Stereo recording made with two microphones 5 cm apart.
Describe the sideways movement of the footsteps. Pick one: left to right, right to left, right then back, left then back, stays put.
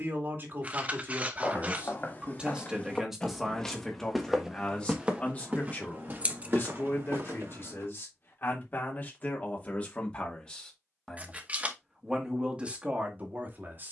left to right.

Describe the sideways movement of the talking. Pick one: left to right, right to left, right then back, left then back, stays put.
left then back.